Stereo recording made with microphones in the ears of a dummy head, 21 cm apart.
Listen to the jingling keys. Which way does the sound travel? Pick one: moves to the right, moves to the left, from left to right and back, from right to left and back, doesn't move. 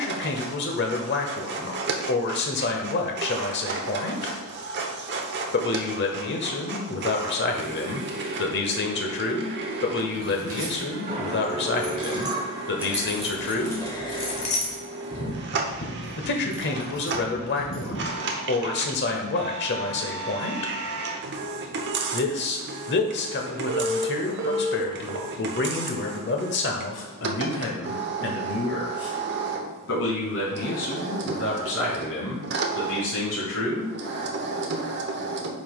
moves to the left.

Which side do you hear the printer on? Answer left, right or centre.
right.